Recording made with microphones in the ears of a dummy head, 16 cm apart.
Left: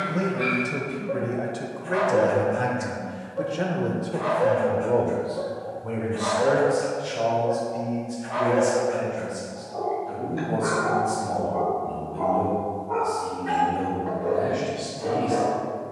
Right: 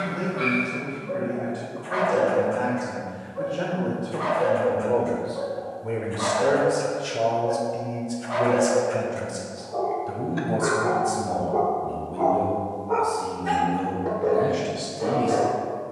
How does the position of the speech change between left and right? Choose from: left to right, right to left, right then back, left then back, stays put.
left to right.